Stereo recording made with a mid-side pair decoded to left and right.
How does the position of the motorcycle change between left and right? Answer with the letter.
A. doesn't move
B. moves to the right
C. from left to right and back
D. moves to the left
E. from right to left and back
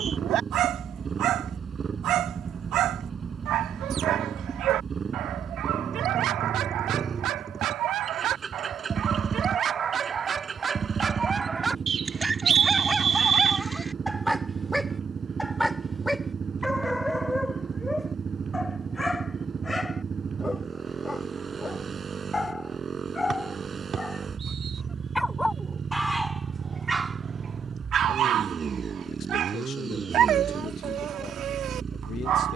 A.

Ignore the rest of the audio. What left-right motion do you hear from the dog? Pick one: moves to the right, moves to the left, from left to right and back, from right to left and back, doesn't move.
from right to left and back.